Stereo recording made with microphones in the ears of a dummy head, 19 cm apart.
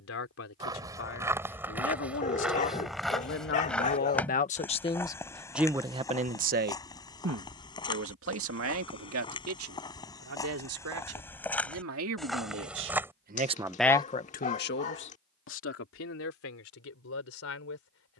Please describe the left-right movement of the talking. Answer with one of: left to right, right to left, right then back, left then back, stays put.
right then back.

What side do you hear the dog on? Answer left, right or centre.
left.